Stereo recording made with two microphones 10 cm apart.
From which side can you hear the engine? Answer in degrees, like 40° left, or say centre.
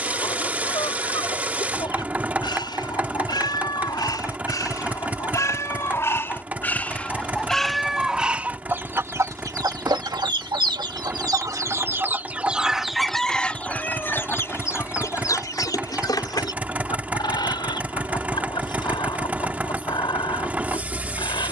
20° right.